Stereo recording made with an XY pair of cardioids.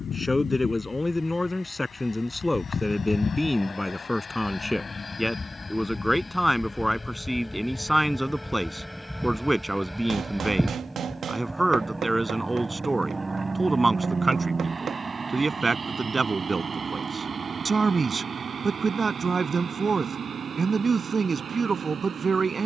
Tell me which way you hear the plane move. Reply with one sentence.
In this clip you hear the plane travel towards the right.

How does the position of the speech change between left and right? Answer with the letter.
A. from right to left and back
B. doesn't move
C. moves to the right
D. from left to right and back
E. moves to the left
C.